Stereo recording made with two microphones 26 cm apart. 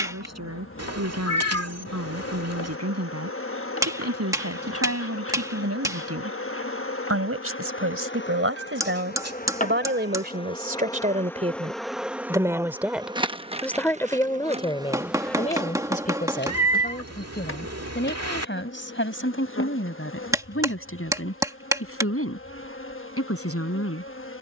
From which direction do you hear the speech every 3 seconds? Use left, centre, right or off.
right, right, right, right, centre, left, left, left.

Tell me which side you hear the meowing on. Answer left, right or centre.
right.